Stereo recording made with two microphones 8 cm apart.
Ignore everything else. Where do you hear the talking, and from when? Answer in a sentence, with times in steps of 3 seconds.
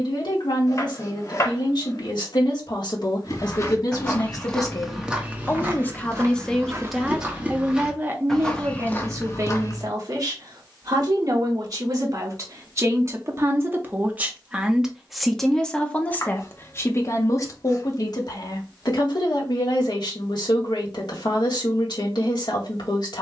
In this clip you hear the talking on the left from 0 s, in the centre from 6 s, on the right from 9 s and on the left from 15 s.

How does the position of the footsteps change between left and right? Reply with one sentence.
You can hear the footsteps move from left to right and back again.